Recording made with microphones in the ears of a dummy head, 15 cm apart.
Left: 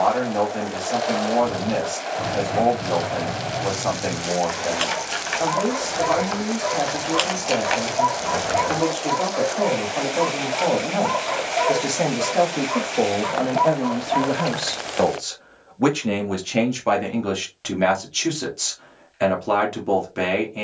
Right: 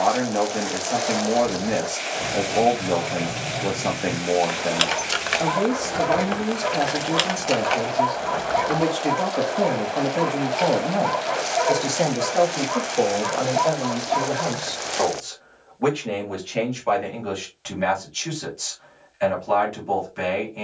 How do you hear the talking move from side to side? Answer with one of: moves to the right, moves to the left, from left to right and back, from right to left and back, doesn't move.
moves to the left.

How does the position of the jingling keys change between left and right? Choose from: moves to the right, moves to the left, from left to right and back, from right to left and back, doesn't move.
from left to right and back.